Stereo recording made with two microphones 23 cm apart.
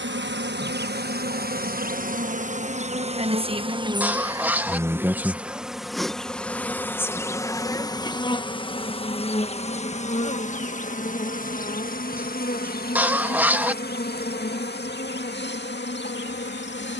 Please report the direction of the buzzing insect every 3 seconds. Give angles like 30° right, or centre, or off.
40° right, 10° right, 10° left, 30° left, 40° left, 50° left.